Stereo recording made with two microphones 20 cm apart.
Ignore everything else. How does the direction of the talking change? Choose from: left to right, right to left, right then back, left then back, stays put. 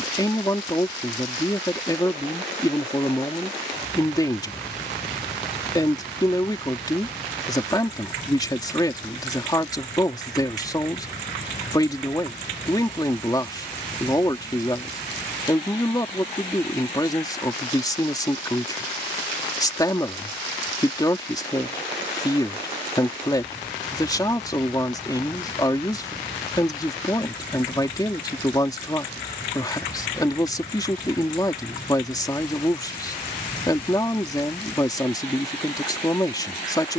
stays put.